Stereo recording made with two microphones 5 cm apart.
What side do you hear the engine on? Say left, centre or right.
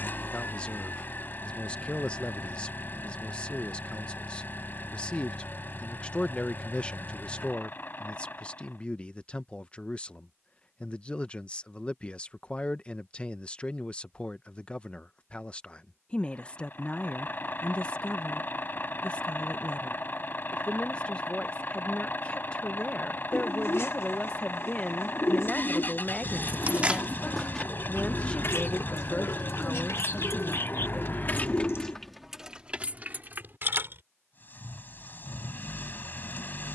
left.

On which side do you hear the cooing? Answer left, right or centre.
left.